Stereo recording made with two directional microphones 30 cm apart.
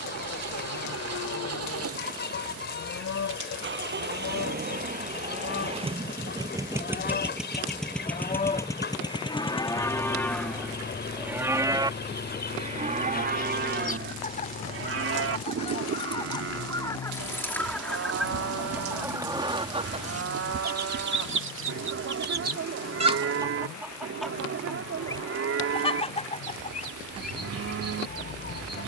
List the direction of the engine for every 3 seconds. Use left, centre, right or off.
right, right, centre, left, left, left, left, left, left, left.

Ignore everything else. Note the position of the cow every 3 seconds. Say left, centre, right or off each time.
left, left, left, centre, right, right, right, right, right, right.